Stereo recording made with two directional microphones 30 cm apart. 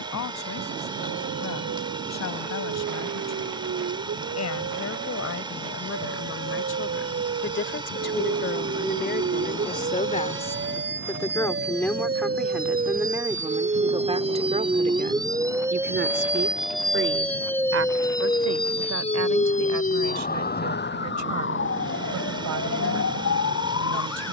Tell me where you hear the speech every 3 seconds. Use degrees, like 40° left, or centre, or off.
60° left, 50° left, 40° left, 20° left, 10° right, 40° right, 60° right, 60° right.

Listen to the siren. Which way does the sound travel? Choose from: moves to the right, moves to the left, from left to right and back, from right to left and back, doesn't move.
moves to the left.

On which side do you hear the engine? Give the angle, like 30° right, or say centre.
10° right.